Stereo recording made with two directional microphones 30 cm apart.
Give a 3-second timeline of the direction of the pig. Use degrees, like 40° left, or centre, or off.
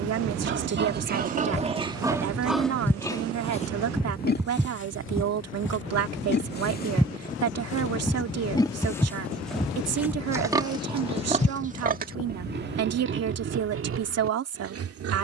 20° right, 30° left, 20° left, 10° right, 40° right.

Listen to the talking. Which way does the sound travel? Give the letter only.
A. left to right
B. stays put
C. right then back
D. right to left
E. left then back
B.